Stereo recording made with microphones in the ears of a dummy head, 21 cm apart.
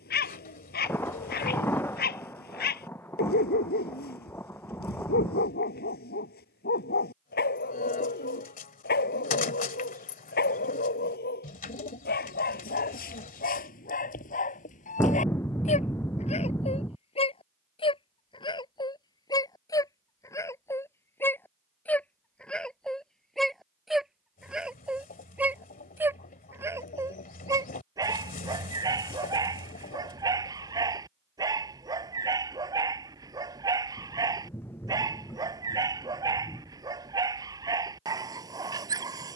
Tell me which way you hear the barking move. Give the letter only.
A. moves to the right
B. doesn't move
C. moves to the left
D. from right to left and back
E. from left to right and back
A.